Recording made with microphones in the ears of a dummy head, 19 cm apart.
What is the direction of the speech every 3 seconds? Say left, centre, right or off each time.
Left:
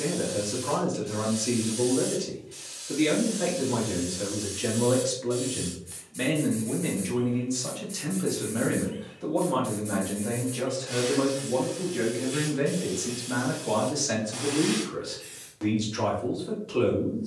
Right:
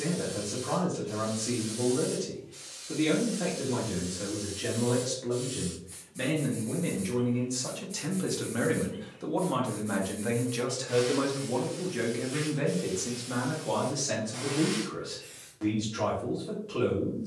left, left, centre, right, centre, left.